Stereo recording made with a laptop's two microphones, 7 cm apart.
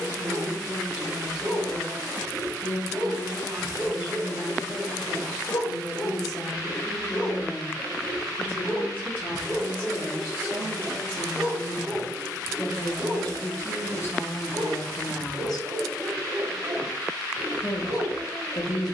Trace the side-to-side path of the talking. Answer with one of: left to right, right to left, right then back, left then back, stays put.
right to left.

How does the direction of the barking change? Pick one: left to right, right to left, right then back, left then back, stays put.
left then back.